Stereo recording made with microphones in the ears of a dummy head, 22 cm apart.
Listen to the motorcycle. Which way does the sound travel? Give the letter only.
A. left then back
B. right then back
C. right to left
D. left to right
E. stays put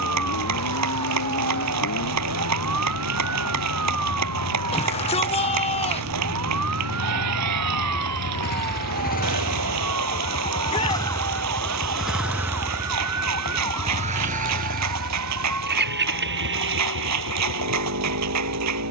D.